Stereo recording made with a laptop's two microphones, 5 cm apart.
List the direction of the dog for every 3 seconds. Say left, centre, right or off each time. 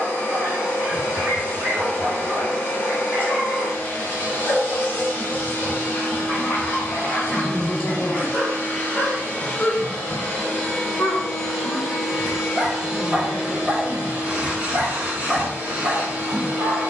right, centre, left, centre, right, right.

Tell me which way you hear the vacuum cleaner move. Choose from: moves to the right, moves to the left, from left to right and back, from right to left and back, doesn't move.
moves to the right.